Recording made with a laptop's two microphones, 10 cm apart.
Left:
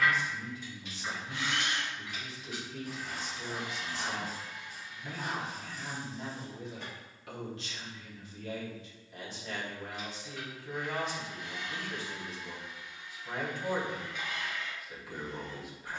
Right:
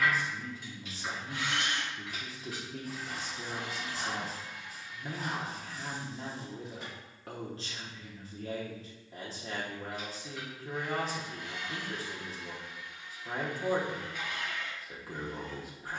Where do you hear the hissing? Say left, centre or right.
centre.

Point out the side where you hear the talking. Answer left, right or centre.
right.